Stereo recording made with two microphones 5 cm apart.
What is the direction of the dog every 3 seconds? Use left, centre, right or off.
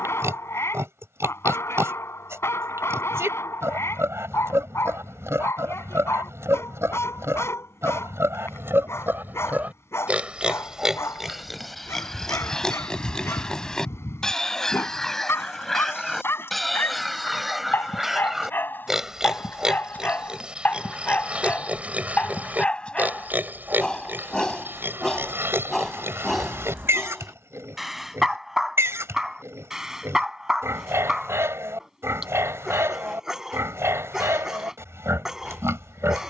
left, left, left, left, left, left, left, left, centre, centre, centre, centre.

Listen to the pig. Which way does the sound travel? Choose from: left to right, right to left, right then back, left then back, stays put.
left then back.